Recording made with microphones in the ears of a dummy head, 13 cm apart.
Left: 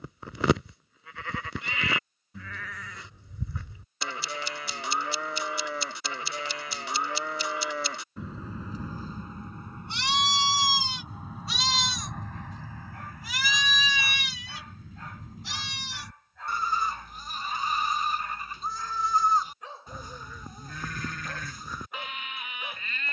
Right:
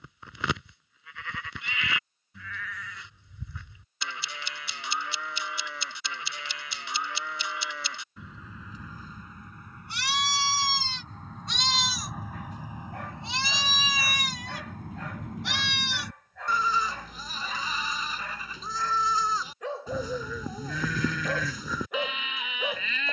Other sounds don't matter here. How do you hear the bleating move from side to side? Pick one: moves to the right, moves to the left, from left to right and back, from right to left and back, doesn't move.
moves to the right.